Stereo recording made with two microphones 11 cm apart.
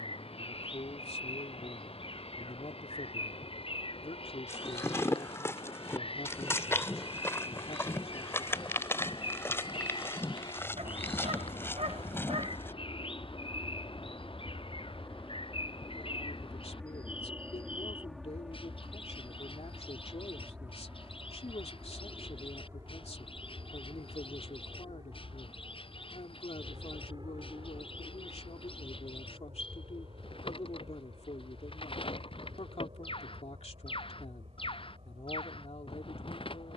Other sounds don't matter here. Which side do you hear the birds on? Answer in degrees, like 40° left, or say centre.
50° left.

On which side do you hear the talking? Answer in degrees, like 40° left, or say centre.
60° left.